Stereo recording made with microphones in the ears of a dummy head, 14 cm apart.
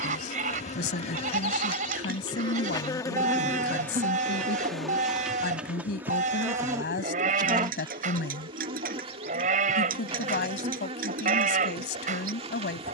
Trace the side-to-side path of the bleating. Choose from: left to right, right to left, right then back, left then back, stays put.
stays put.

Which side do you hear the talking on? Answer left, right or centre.
left.